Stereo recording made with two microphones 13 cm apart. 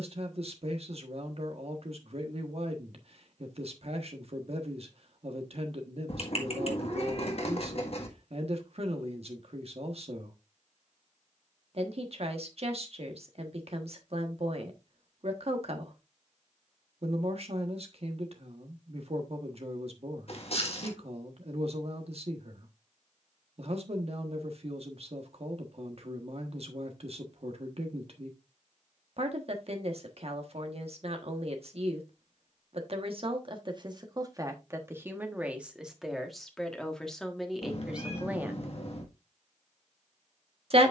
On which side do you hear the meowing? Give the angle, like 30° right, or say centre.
50° left.